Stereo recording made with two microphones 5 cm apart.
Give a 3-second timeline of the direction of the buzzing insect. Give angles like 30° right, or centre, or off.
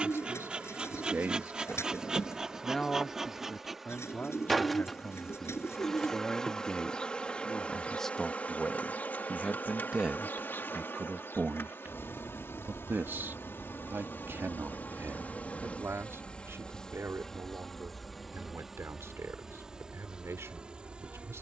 20° right, centre, 30° left, 50° left, 60° left, 20° left, 10° right.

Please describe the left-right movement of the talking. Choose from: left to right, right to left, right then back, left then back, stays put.
left then back.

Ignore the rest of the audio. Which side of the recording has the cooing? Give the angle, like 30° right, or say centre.
80° left.